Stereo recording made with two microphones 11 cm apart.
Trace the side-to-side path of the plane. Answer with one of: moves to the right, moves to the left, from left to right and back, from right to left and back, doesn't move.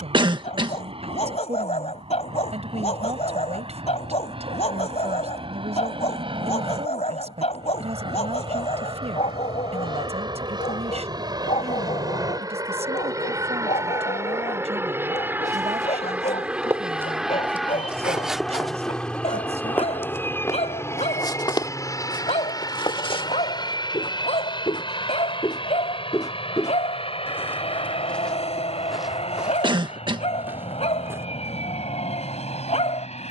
moves to the left.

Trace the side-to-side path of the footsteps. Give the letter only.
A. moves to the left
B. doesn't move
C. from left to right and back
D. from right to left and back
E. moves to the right
D.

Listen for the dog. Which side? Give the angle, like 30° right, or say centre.
80° left.